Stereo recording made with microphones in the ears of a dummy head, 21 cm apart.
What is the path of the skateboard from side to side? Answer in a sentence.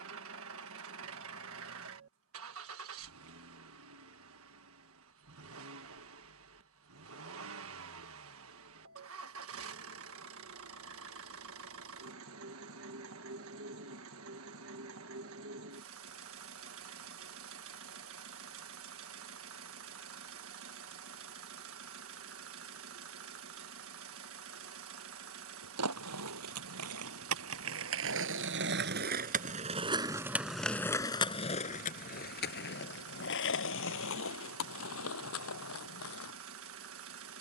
You can hear the skateboard move to the left.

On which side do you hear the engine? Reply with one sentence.
In this clip you hear the engine on the right.